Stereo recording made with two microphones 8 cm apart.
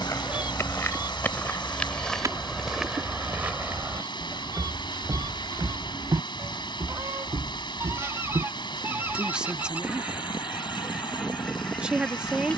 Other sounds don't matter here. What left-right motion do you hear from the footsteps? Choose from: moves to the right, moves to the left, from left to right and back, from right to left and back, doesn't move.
moves to the right.